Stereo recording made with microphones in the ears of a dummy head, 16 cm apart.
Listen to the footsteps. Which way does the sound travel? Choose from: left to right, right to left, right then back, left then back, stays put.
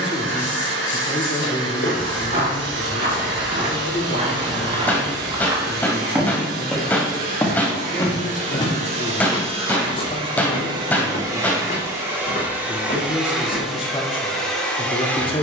right to left.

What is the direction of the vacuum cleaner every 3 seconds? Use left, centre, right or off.
right, right, right, right, centre.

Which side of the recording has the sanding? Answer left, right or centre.
left.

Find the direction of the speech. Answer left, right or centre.
left.